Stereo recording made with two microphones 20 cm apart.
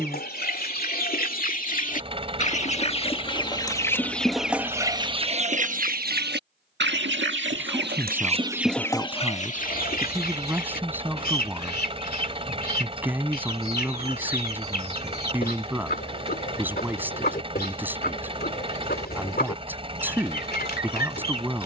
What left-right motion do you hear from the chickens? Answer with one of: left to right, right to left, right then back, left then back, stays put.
right then back.